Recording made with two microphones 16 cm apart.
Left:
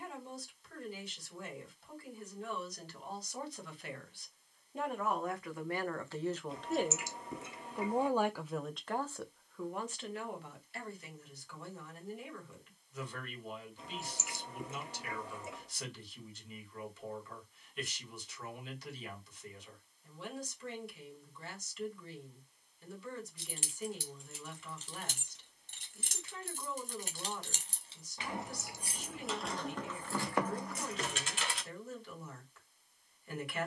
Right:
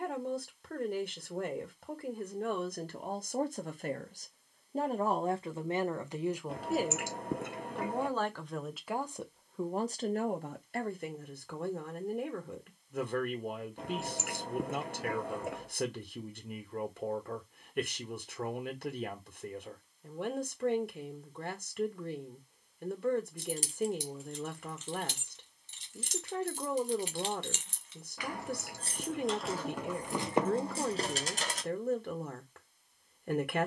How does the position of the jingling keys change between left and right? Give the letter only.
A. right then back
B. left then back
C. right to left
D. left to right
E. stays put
B.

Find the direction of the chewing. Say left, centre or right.
right.